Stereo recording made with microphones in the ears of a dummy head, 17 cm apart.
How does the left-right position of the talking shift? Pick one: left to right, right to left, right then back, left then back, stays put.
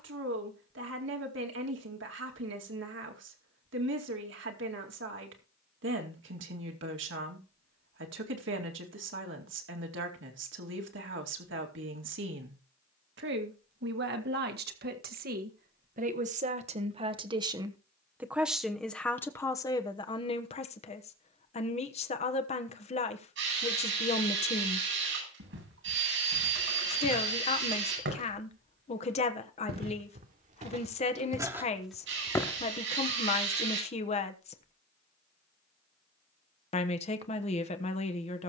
right to left.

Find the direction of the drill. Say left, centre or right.
right.